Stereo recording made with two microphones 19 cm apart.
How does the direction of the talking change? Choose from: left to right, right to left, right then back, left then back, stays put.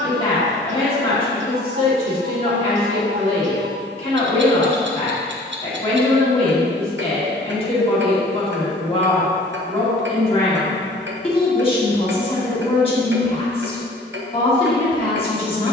stays put.